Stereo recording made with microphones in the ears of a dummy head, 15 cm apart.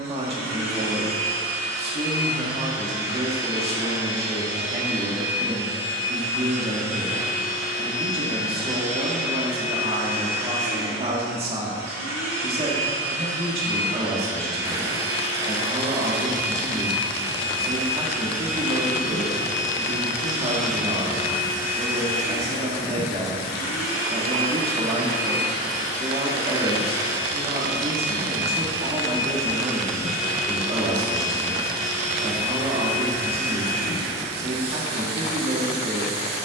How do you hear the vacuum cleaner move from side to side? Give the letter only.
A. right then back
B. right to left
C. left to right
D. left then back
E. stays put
E.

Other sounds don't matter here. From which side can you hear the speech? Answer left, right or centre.
right.